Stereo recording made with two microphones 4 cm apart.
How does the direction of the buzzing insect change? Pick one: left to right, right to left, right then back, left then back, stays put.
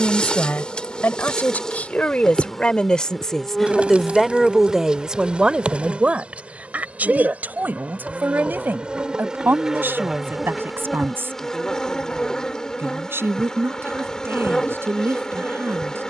right then back.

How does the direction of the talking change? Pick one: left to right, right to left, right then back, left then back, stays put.
left to right.